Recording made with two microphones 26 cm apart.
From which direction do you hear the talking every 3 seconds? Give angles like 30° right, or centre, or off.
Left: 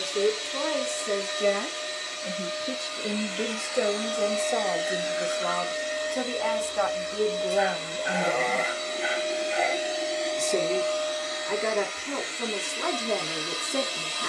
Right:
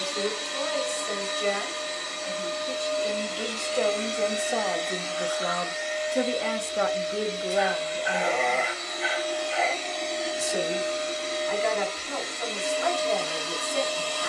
50° left, 10° left, centre, 50° left, 50° left.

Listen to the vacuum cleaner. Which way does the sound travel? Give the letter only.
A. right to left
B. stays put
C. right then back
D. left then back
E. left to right
D.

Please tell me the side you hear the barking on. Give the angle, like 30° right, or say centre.
centre.